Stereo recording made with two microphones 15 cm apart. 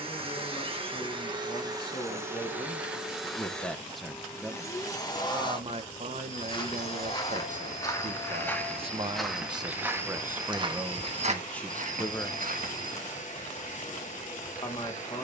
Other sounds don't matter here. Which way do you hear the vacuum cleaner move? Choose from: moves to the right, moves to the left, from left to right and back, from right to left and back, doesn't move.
moves to the left.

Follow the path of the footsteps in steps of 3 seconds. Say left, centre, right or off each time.
off, off, left, right, right.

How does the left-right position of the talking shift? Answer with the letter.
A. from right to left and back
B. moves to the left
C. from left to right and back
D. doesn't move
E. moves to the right
C.